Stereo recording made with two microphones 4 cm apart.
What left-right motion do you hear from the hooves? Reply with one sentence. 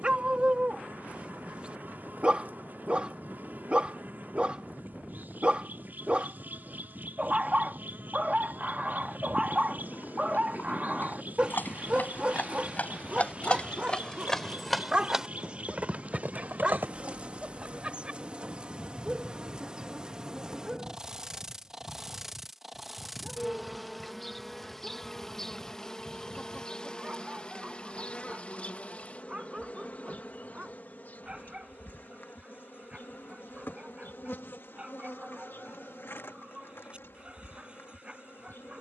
You can hear the hooves go from the left side to the right.